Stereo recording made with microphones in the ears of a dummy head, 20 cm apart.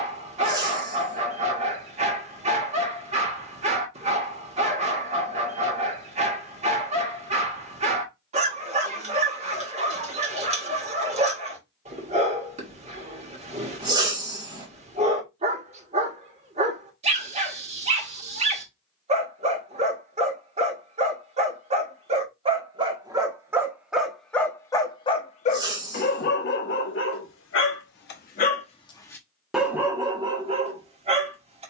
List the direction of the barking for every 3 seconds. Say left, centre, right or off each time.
right, right, right, right, right, right, right, right, left, left, right.